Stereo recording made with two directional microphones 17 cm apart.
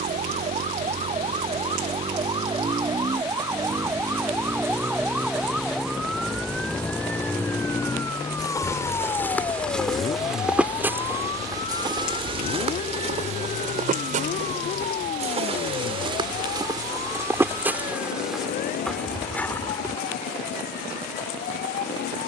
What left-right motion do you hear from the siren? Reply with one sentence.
You can hear the siren move to the left.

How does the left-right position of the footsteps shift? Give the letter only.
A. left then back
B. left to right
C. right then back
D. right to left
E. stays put
C.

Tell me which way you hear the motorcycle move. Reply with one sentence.
You can hear the motorcycle go from the right side to the left.